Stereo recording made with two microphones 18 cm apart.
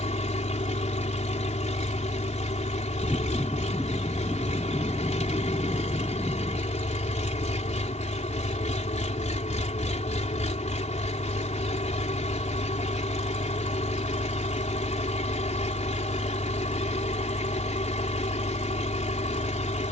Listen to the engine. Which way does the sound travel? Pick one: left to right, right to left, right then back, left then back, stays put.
stays put.